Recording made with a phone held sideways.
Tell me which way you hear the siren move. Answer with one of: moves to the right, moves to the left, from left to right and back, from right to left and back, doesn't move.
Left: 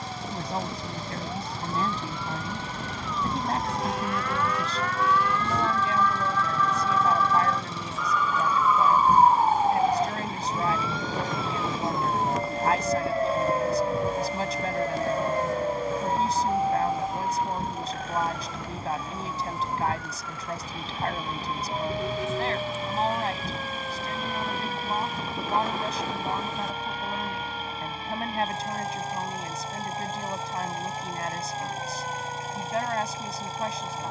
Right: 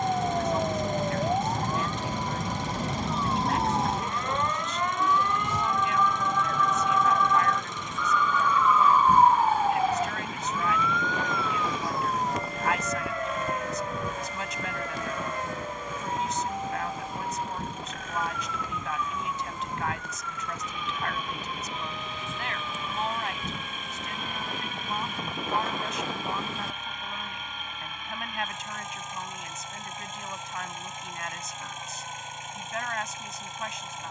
moves to the left.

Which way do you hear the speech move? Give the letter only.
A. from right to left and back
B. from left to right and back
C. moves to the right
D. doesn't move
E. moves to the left
D.